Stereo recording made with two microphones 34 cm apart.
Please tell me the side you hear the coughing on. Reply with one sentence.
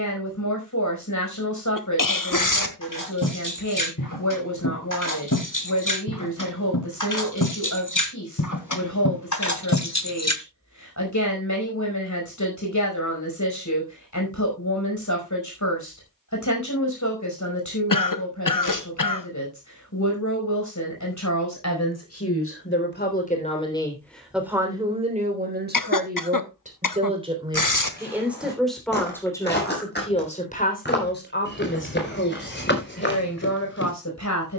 You can hear the coughing on the left.